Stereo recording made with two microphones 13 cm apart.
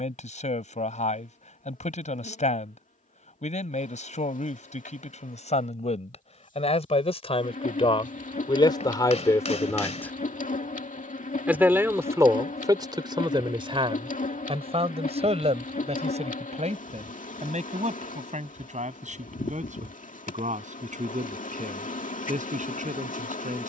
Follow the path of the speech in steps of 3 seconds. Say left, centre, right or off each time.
left, left, left, centre, right, right, right, right.